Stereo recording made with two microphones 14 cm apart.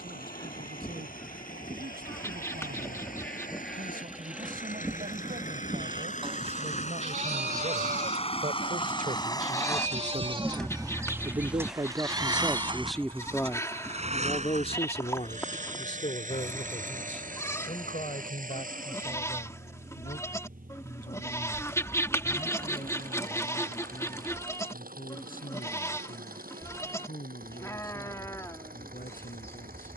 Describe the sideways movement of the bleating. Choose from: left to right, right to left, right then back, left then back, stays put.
right then back.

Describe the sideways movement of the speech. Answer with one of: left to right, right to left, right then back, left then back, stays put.
right to left.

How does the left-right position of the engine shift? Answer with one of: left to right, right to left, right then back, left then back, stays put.
left to right.